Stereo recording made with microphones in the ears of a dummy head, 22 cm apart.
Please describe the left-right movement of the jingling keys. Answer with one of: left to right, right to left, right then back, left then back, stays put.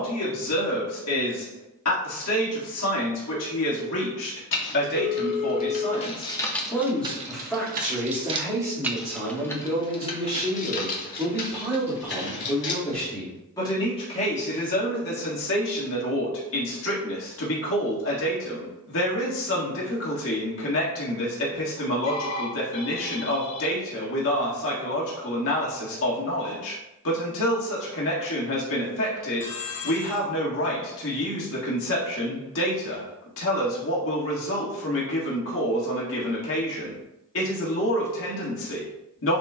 right then back.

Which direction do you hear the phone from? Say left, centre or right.
left.